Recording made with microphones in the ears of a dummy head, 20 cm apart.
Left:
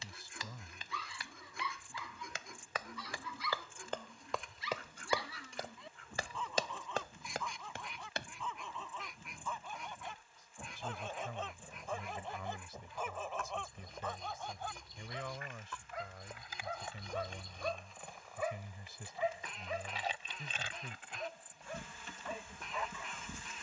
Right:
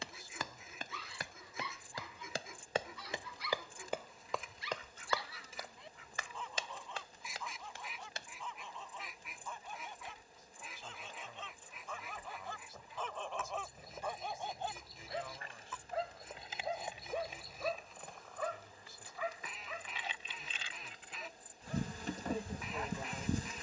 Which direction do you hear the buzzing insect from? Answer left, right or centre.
right.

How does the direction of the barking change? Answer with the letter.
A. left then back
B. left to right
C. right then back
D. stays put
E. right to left
C.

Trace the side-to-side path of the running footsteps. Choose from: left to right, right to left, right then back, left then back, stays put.
right to left.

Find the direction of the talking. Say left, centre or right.
left.